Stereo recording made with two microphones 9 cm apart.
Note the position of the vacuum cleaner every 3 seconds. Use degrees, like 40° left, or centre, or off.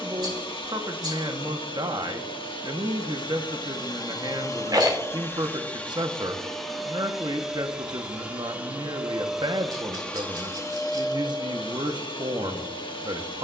70° left, 40° left, centre, 30° left, 70° left.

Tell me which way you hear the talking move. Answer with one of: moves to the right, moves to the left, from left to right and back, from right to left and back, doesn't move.
doesn't move.